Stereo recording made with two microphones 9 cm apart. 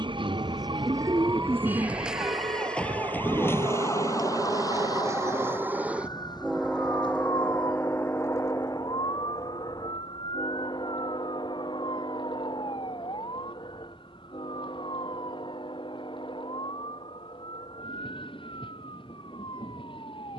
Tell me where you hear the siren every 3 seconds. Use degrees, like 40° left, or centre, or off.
20° right, 40° left, 60° left, 60° left, 70° left, 70° left, 70° left.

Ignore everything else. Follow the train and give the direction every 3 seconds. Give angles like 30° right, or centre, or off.
70° right, 40° right, 20° left, 50° left, 60° left, 70° left, 70° left.